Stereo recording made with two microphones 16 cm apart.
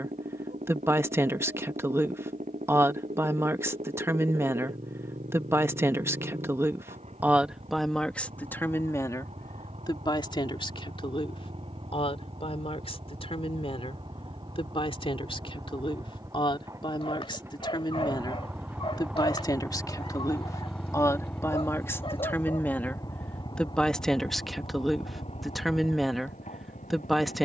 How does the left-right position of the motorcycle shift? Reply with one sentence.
In this clip you hear the motorcycle move from right to left.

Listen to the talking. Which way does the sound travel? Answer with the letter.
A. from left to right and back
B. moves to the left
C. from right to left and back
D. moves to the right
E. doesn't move
C.